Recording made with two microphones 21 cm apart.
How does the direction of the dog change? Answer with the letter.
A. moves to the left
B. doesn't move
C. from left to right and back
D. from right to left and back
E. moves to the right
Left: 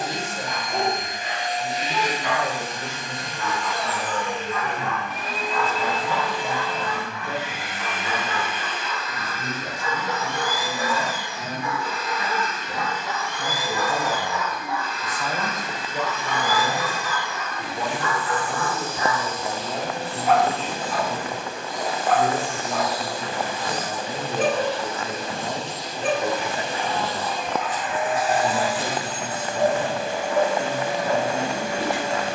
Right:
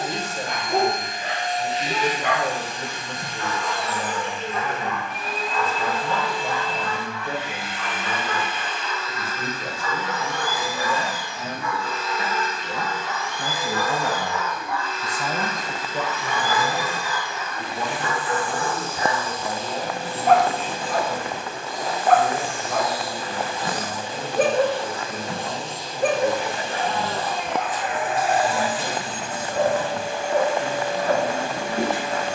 D.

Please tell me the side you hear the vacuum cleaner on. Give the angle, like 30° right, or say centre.
80° left.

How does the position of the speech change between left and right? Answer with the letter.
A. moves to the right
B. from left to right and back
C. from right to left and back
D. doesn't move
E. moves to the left
E.